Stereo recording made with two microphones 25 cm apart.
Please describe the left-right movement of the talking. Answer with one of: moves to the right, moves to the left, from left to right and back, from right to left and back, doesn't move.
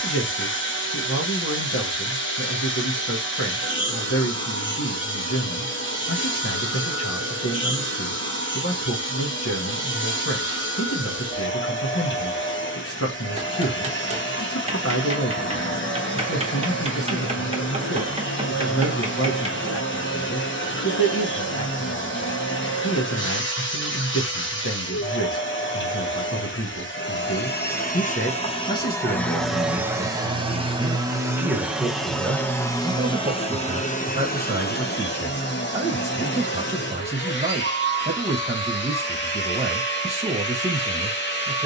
moves to the right.